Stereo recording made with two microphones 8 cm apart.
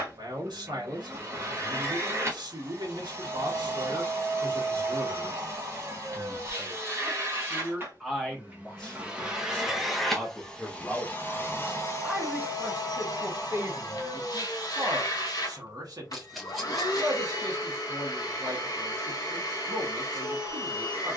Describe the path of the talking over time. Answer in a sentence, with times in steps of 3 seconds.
You can hear the talking on the right from 0 s, in the centre from 6 s and on the right from 12 s.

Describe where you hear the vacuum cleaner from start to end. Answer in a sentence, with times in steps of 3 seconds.
In this clip you hear the vacuum cleaner on the right from 0 s, in the centre from 9 s and on the left from 12 s.